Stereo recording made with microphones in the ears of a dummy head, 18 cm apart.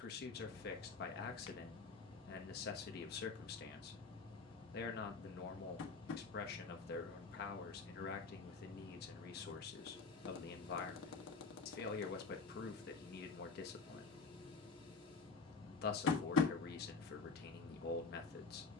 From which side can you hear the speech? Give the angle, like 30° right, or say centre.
50° left.